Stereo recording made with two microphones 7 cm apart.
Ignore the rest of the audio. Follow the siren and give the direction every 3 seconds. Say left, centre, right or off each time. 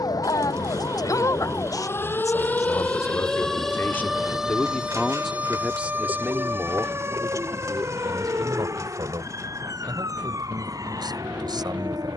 left, centre, right, right.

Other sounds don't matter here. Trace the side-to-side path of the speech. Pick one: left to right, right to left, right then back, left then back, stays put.
left to right.